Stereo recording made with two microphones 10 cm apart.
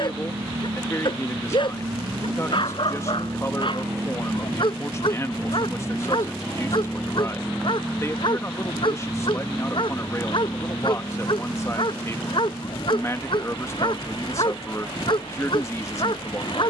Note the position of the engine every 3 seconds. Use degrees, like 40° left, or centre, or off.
40° right, 20° right, 10° left, 30° left, 50° left, 50° left.